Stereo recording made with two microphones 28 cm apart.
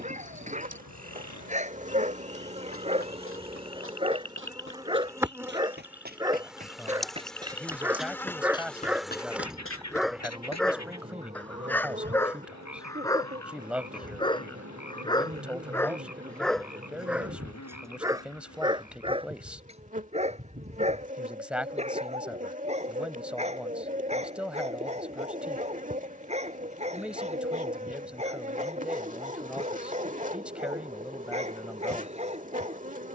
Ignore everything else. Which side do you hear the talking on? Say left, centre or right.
centre.